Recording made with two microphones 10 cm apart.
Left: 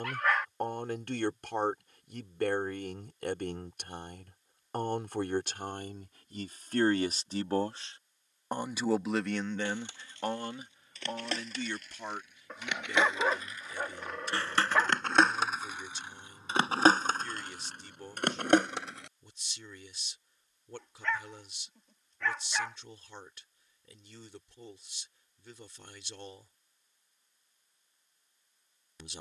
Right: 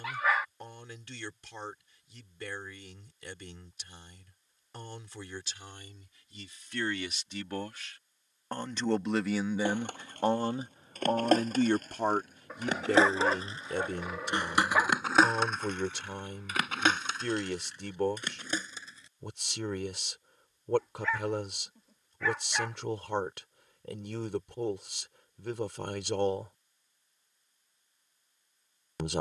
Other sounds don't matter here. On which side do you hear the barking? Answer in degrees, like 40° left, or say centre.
10° right.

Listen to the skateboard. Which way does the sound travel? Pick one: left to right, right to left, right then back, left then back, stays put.
right to left.